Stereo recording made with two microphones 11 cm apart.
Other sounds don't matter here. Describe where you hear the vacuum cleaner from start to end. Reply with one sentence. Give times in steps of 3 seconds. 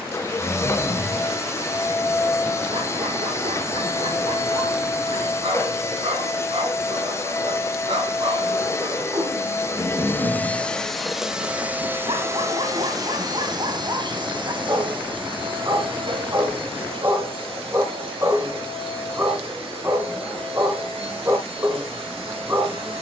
In this clip you hear the vacuum cleaner on the left from 0 s, in the centre from 9 s and on the right from 12 s.